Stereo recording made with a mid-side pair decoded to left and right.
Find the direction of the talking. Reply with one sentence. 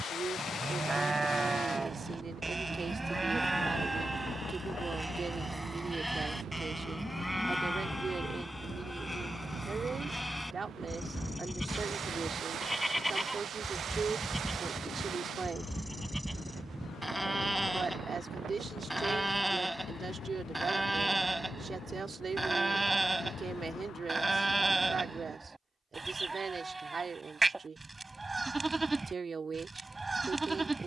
You can hear the talking on the right.